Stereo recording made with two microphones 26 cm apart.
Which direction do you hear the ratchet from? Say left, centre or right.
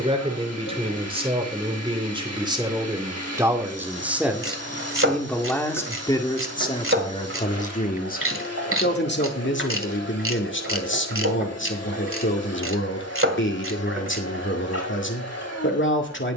right.